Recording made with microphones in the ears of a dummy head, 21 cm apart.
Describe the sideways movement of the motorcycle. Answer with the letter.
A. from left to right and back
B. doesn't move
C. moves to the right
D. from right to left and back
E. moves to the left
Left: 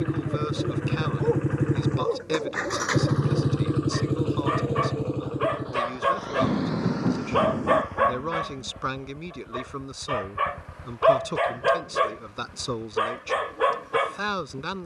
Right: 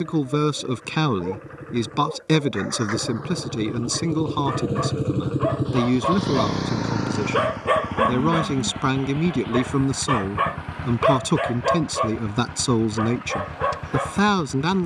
C.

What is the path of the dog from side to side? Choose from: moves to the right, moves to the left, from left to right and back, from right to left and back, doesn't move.
from left to right and back.